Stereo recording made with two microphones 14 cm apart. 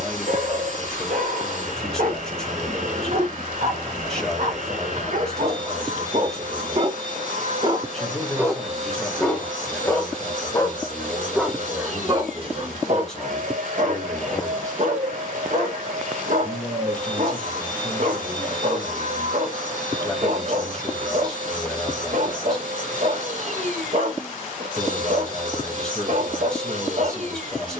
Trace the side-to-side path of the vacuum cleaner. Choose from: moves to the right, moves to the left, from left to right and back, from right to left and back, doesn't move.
doesn't move.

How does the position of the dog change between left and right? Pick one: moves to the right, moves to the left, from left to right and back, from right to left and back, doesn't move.
from right to left and back.